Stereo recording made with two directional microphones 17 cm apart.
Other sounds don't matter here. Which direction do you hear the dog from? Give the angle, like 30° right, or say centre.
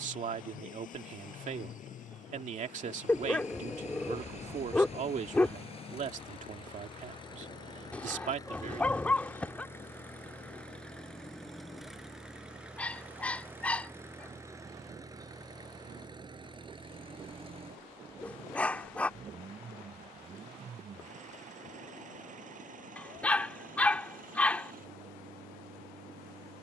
10° left.